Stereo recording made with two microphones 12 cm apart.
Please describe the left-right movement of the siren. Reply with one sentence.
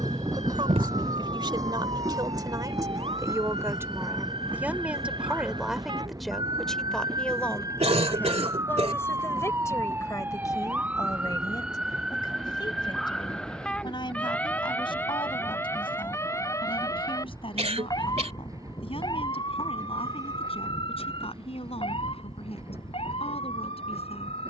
In this clip you hear the siren travel towards the left.